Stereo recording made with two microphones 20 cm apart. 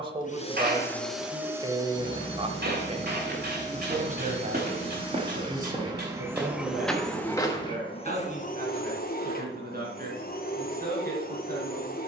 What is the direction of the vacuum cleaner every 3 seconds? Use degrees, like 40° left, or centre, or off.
centre, 30° right, 20° left, 50° left.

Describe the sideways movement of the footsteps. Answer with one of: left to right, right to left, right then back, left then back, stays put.
right to left.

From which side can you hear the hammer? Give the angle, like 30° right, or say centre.
60° right.